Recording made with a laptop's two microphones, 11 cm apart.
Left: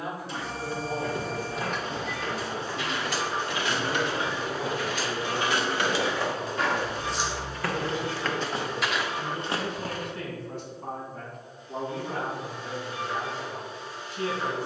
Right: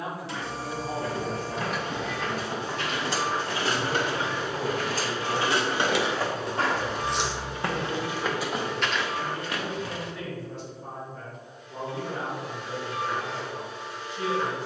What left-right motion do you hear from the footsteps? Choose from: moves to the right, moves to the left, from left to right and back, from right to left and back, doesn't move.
moves to the left.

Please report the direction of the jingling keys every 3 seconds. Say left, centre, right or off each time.
centre, right, centre, off, off.